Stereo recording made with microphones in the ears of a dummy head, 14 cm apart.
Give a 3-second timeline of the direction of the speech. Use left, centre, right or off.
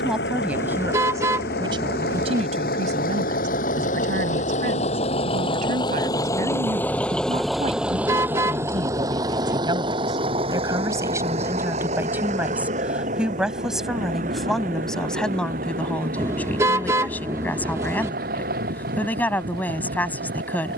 right, right, right, right, centre, centre, centre.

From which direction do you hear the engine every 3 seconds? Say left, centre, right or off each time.
left, left, centre, right, right, right, right.